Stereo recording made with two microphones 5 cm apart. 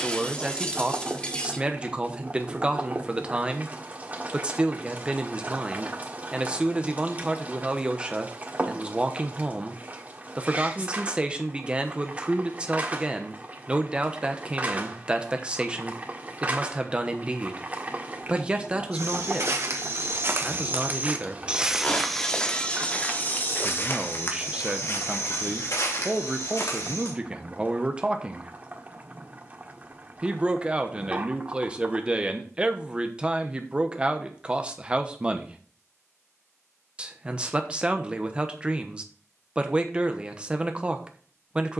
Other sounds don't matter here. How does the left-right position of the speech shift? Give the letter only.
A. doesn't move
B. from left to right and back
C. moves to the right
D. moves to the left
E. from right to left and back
A.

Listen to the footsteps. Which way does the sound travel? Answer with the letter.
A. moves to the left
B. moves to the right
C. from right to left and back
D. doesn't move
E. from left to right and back
A.